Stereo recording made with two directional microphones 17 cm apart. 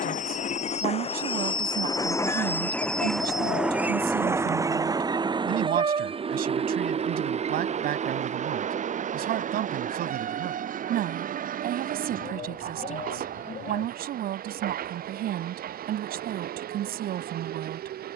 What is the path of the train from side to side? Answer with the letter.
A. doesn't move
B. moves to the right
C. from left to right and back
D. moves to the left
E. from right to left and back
B.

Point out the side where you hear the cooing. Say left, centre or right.
left.